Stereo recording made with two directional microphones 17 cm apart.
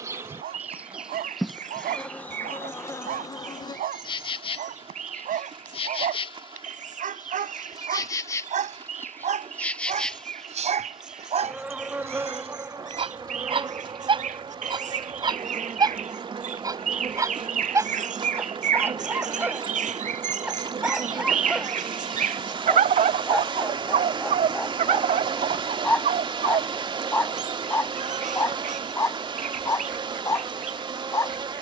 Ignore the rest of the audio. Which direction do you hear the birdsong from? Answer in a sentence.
In this clip you hear the birdsong on the right.